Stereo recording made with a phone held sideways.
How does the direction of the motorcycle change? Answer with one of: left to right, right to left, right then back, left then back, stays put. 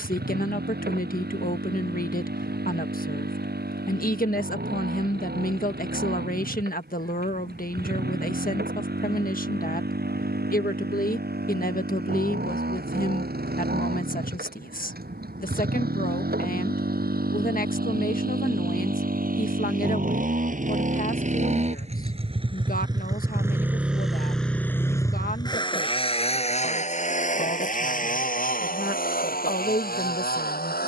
right to left.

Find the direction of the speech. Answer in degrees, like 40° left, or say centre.
60° left.